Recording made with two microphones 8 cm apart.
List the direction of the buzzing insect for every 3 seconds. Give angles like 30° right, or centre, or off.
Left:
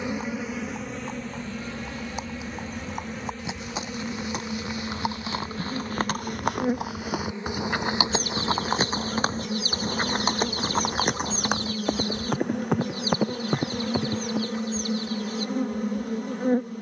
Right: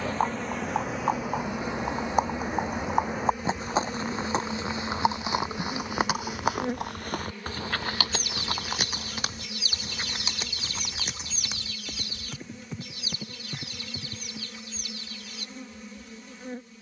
10° right, centre, 20° left, 50° left, 60° left, 60° left.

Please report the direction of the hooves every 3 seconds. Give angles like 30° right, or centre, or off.
50° right, 30° right, 10° left, 50° left, 70° left, off.